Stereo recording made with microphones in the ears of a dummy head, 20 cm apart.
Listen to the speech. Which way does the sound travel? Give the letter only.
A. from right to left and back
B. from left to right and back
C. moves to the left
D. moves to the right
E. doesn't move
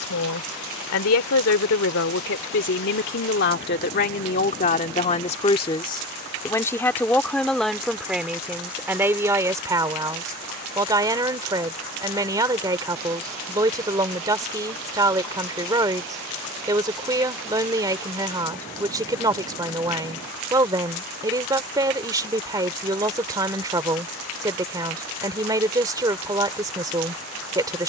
D.